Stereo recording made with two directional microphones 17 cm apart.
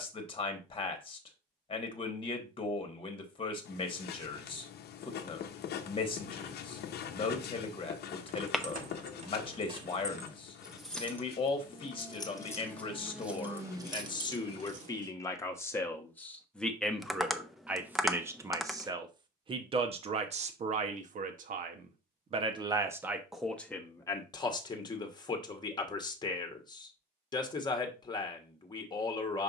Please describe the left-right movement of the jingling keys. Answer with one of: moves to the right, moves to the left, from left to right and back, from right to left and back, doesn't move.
from right to left and back.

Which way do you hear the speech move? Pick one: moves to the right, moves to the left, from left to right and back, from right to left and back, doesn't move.
from left to right and back.